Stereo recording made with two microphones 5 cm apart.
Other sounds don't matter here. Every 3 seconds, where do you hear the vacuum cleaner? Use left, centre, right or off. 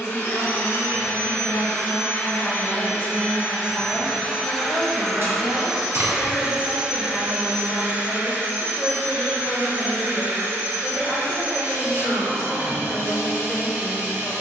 left, centre, right, right, right.